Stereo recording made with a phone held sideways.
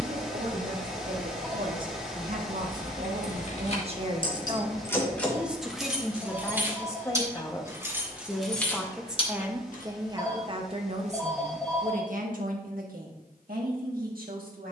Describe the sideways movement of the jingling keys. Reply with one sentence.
In this clip you hear the jingling keys move from left to right and back again.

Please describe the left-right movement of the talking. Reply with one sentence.
In this clip you hear the talking go left and come back.